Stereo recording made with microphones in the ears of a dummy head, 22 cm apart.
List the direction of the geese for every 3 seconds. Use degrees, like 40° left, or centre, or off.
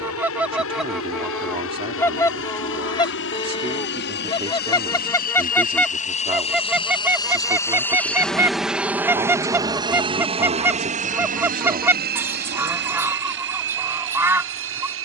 centre, 20° left, 10° right, 10° right, 10° right.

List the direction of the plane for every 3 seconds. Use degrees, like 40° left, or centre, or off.
60° left, 50° left, 10° left, 20° right, 50° right.